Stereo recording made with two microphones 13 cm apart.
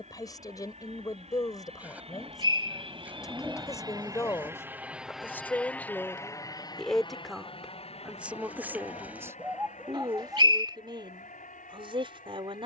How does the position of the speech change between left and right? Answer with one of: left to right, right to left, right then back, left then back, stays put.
left to right.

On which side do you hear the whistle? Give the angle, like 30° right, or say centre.
40° right.